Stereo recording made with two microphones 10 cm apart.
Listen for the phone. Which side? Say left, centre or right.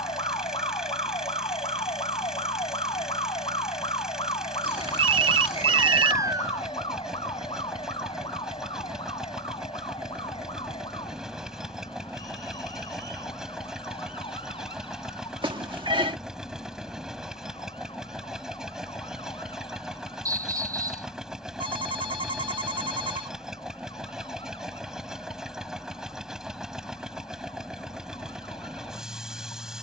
right.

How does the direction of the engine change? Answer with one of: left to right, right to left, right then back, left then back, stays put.
stays put.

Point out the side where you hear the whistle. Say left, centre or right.
right.